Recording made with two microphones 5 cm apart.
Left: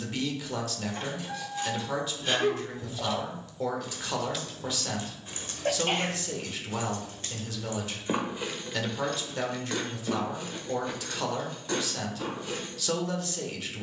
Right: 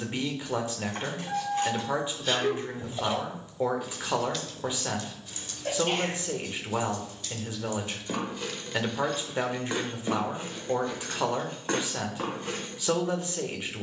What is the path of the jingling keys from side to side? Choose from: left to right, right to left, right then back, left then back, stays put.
left then back.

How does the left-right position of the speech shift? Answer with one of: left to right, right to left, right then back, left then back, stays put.
stays put.